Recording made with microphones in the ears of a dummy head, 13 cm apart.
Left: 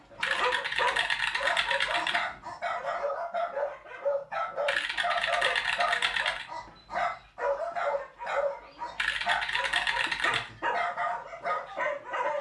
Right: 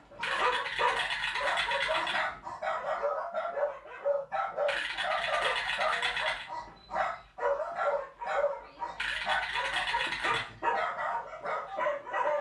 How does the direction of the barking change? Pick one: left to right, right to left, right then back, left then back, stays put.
stays put.